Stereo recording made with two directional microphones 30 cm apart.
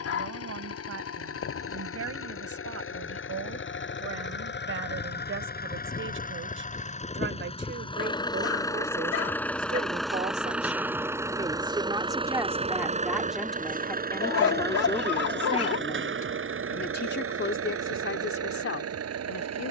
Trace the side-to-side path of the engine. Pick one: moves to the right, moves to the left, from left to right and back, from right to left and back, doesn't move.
moves to the right.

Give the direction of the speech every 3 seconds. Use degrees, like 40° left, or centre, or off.
50° right, 50° right, 40° right, 20° right, centre, 30° left, 50° left.